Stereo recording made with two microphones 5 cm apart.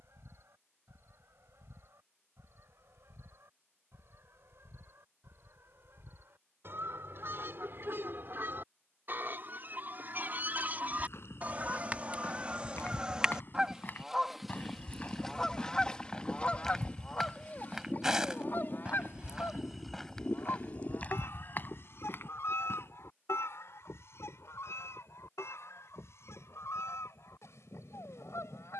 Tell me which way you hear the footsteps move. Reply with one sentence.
You can hear the footsteps go right and come back.